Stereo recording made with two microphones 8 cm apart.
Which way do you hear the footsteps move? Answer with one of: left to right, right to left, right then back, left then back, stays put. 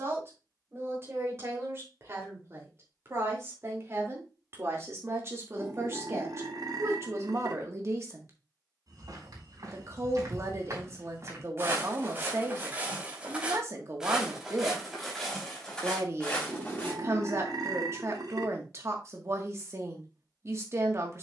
right to left.